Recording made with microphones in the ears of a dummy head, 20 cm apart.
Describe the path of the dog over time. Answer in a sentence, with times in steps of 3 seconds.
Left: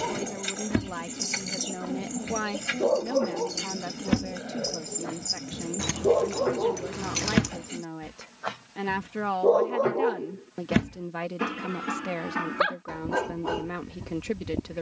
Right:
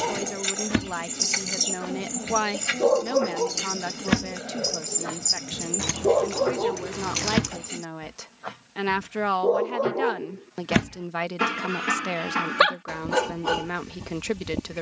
You can hear the dog on the right from 0 s, in the centre from 6 s and on the right from 9 s.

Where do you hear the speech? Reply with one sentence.
In this clip you hear the speech on the right.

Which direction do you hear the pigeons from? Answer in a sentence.
You can hear the pigeons on the right.